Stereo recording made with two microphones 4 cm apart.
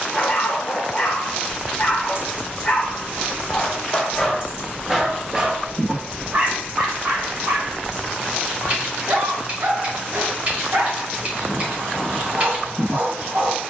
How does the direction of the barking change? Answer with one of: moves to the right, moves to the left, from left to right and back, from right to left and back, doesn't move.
moves to the right.